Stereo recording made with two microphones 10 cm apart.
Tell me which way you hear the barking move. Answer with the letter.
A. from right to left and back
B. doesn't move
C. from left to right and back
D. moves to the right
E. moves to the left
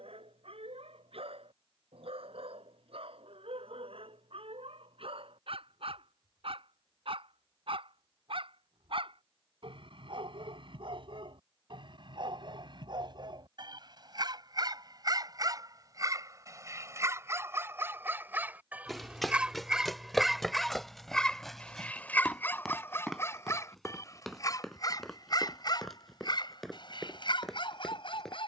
E.